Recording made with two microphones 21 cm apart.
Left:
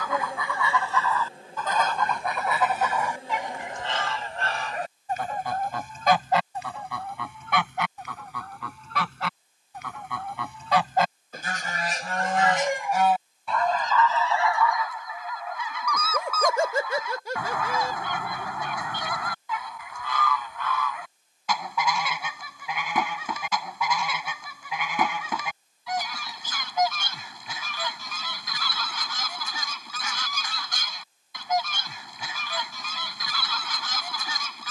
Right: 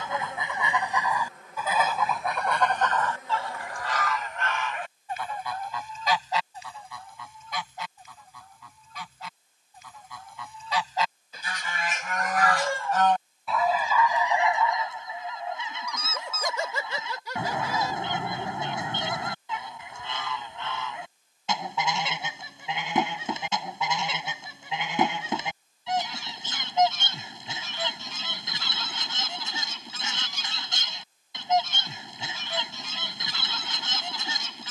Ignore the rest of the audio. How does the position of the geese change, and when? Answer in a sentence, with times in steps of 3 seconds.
You can hear the geese in the centre from 0 s, on the left from 3 s, in the centre from 12 s and on the right from 15 s.